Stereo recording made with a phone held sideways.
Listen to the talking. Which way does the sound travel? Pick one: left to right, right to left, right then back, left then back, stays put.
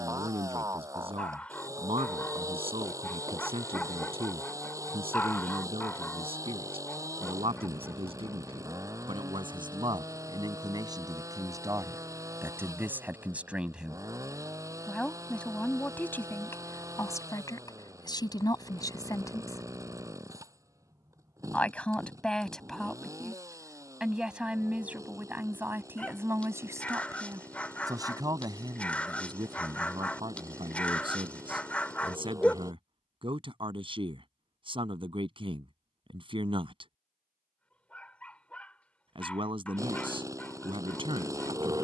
left then back.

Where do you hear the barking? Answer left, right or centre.
centre.